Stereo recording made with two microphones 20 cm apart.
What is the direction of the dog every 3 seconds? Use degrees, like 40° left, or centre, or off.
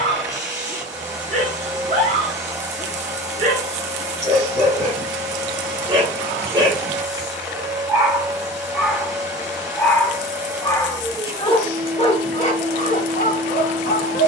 40° right, 30° right, 10° right, 20° left, 40° left.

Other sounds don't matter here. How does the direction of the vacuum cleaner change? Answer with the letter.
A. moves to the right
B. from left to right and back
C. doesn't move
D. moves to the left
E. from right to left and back
C.